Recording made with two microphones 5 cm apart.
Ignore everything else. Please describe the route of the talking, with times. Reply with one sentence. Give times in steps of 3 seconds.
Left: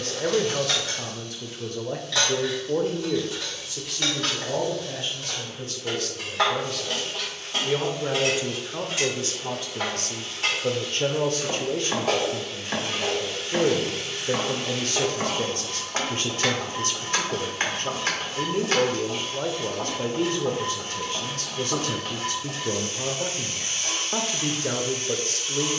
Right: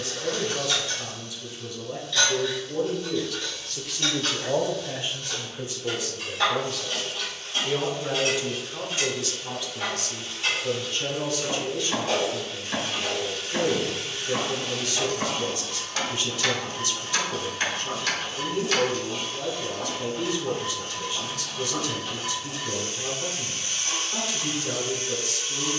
You can hear the talking on the left from 0 s, in the centre from 3 s and on the left from 9 s.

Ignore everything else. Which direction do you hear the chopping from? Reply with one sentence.
In this clip you hear the chopping on the left.